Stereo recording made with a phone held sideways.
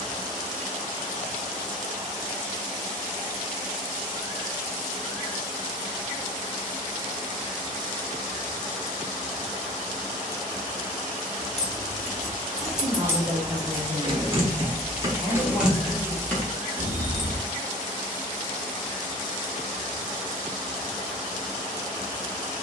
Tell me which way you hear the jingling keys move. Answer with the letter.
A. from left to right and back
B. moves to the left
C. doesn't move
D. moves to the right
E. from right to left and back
A.